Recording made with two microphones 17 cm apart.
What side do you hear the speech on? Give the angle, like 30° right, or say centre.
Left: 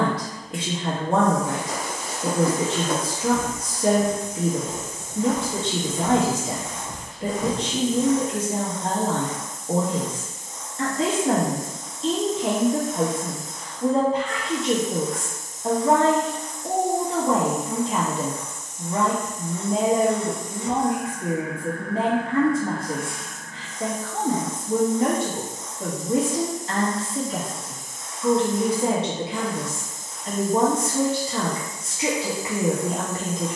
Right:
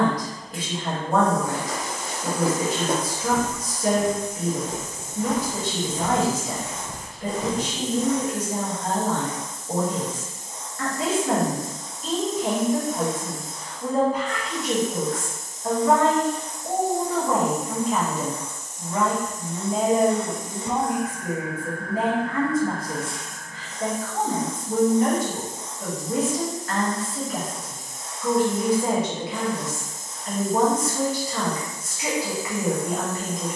30° left.